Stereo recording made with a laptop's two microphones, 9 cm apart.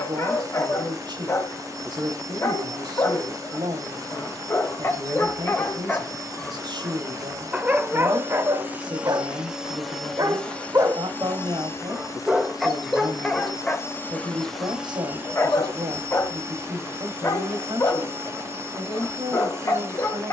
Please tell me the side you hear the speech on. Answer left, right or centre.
right.